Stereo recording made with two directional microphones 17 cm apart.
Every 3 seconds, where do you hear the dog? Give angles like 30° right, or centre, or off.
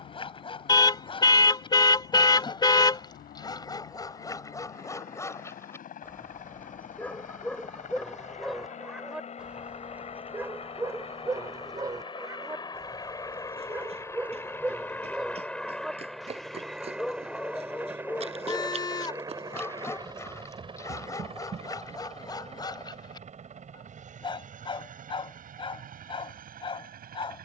30° left, 20° left, 10° left, 10° right, 10° right, centre, 10° left, 20° left, 30° left.